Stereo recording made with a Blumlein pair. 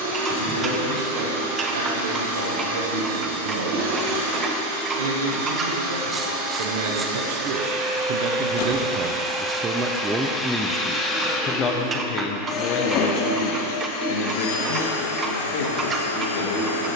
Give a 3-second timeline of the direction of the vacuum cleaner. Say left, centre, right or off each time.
right, right, right, centre, left, left.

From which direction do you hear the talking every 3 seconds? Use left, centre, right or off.
right, right, right, centre, left, left.